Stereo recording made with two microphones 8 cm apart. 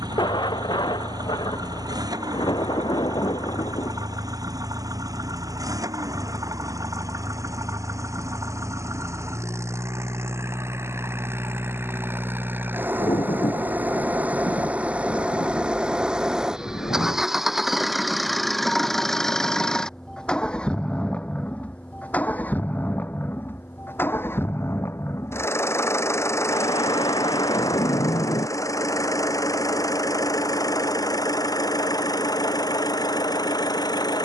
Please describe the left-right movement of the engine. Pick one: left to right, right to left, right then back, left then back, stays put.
right to left.